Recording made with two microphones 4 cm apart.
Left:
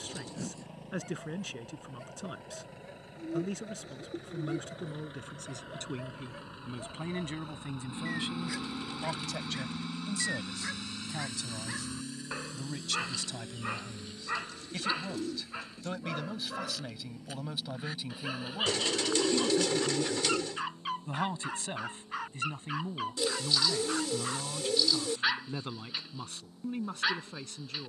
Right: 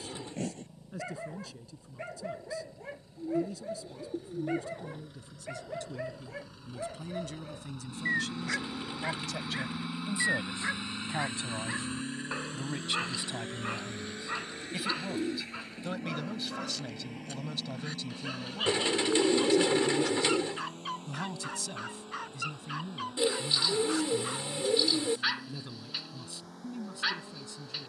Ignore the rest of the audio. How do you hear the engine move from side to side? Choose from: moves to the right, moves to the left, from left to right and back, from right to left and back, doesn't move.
moves to the right.